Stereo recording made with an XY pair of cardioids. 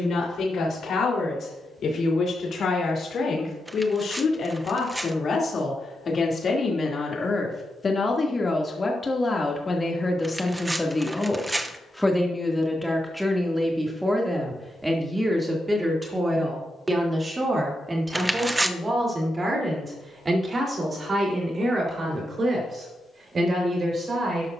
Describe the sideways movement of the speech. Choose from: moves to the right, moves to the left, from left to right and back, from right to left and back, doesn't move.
moves to the right.